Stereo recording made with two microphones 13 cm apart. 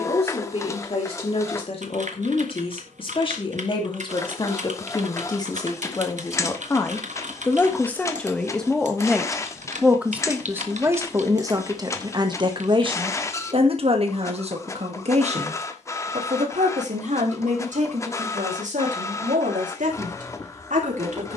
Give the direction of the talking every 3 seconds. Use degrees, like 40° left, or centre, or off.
50° left, 30° left, 10° left, 20° right, 50° right, 60° right, 70° right.